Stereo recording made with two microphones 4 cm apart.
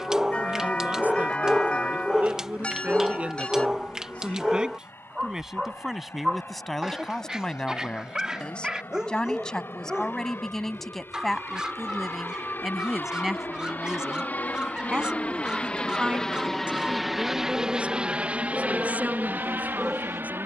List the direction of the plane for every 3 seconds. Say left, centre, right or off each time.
left, left, left, left, left, centre, right.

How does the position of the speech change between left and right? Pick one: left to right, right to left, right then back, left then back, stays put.
left then back.